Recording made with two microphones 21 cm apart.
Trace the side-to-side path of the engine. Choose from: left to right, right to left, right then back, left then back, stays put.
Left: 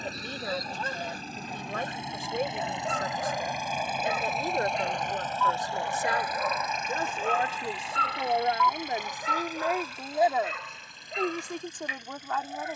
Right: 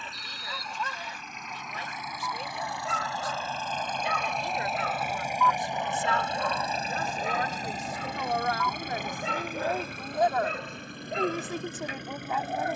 left to right.